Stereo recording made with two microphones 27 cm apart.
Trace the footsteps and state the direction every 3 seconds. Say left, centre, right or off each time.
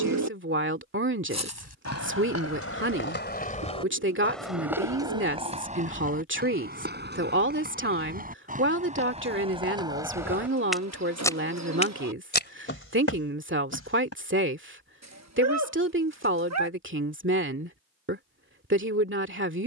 left, centre, right, centre, left, off, off.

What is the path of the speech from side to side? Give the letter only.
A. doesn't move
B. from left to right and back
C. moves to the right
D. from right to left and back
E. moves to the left
A.